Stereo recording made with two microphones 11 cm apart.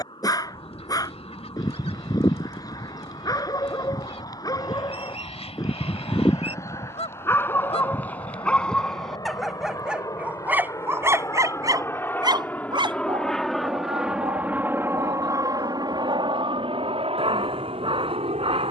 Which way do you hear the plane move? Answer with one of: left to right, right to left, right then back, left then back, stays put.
left to right.